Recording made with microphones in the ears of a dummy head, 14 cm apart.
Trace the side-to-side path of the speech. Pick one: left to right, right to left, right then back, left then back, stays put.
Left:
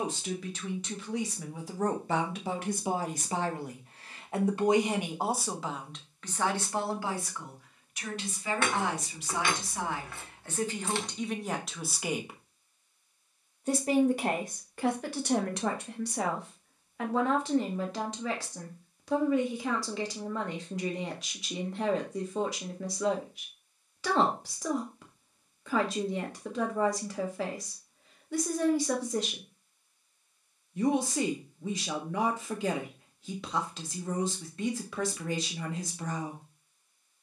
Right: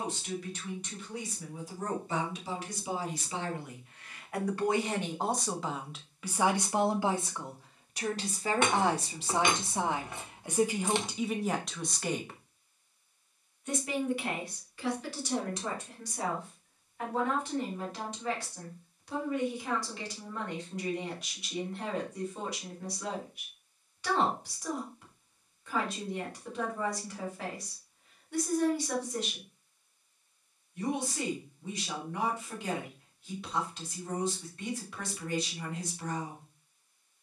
right then back.